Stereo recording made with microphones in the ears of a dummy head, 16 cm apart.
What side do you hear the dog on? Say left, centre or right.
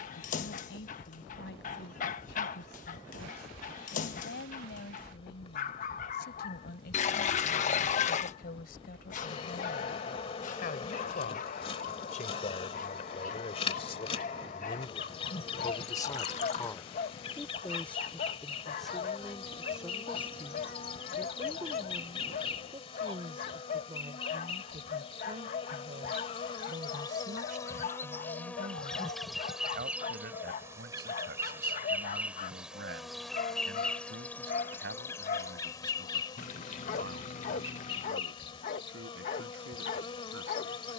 left.